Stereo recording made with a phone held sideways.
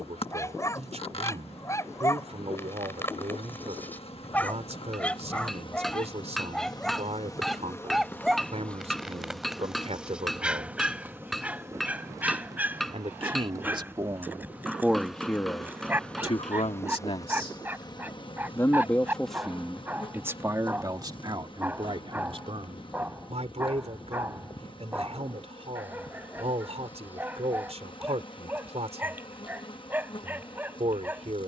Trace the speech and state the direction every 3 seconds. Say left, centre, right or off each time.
right, right, right, right, right, left, centre, right, right, right, right.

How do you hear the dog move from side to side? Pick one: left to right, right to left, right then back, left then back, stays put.
left to right.